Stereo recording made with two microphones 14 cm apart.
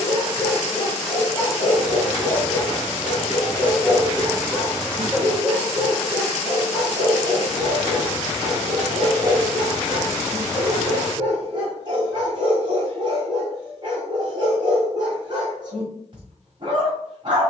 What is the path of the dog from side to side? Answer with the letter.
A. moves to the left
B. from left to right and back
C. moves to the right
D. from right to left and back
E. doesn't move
C.